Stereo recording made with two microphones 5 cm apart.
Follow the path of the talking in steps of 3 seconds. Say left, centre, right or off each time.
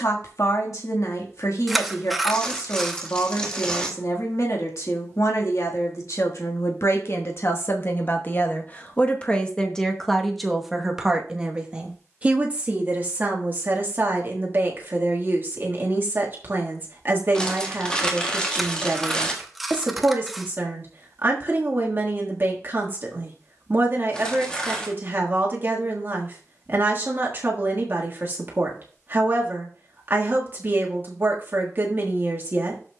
left, left, left, centre, right, right, right, right, right, right, right.